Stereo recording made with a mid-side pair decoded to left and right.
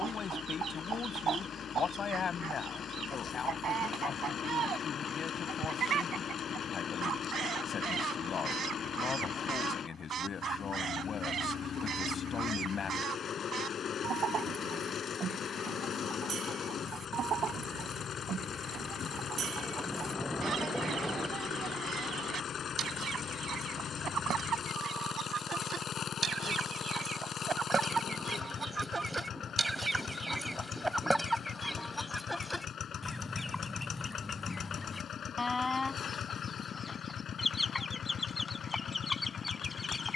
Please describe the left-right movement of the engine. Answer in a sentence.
You can hear the engine stay put.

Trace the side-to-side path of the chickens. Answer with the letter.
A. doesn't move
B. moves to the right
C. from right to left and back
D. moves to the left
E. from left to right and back
D.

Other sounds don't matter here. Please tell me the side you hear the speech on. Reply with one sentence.
You can hear the speech on the left.